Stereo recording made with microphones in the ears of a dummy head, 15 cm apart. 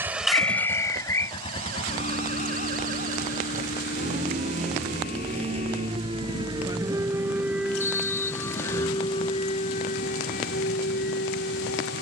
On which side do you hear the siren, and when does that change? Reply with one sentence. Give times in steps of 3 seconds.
In this clip you hear the siren on the right from 0 s, in the centre from 6 s and on the left from 9 s.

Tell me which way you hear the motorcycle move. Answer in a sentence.
You can hear the motorcycle move to the left.